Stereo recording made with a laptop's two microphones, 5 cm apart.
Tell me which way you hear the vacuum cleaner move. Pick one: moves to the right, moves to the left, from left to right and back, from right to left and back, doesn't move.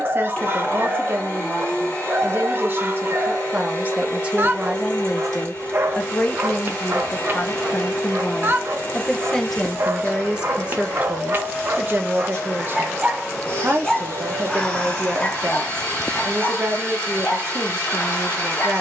doesn't move.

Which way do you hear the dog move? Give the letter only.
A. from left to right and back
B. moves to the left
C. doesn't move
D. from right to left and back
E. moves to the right
B.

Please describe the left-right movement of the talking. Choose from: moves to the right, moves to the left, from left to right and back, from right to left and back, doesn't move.
from right to left and back.